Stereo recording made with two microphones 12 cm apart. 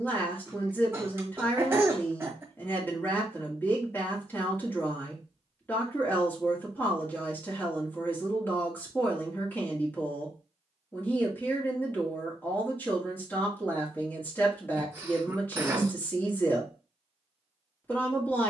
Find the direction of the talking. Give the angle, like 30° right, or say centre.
20° left.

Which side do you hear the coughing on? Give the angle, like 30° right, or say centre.
20° right.